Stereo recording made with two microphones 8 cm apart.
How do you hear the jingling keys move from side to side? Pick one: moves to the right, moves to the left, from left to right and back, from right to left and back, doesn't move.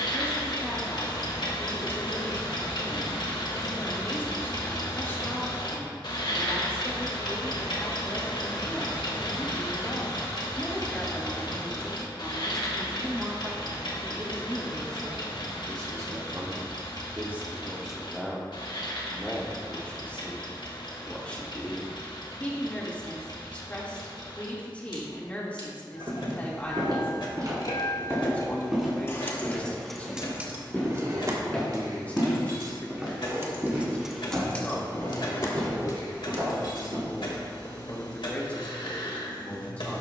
from left to right and back.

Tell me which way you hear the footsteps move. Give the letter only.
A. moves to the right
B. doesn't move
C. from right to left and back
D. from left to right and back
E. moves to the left
C.